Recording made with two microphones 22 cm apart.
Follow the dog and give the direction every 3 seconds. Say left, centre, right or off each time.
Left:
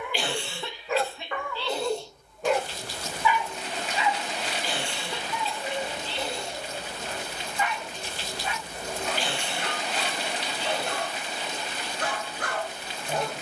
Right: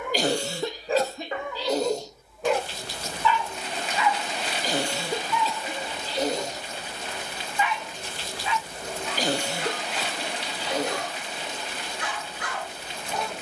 right, left, left, left, left.